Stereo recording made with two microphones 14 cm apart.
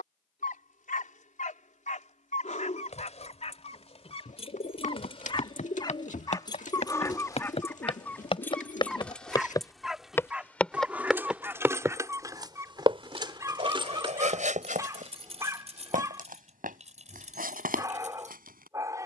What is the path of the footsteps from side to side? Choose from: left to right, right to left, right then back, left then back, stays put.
left to right.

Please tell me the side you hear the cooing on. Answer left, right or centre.
left.